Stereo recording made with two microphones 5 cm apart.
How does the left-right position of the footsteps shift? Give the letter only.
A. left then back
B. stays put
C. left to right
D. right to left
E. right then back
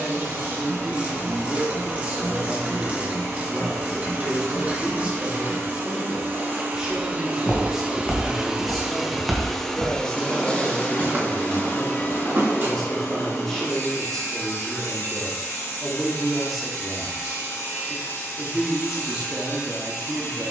C.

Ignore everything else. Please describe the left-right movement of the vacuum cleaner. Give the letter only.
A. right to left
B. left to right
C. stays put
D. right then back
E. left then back
A.